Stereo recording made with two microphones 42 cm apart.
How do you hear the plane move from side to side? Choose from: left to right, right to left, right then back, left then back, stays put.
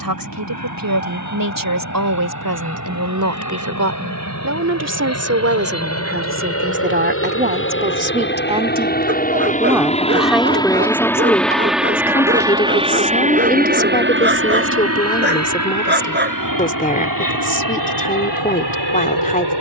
left to right.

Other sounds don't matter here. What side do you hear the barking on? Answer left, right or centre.
right.